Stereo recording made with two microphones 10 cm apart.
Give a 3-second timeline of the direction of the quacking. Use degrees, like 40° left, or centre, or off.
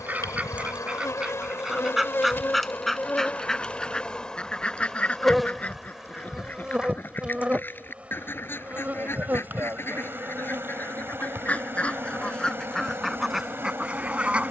centre, 10° left, 20° left, 20° left, centre.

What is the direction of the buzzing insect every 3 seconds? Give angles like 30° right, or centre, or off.
30° left, 10° left, 10° right, 20° right, 30° right.